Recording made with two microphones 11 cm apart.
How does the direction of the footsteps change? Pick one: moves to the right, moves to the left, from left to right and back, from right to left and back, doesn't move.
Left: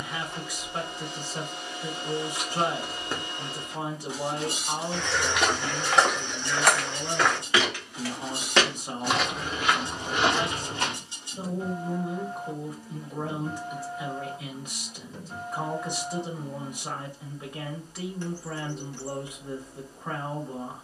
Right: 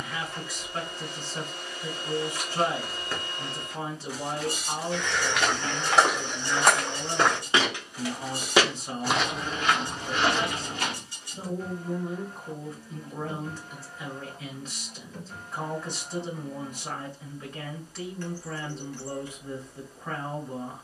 from left to right and back.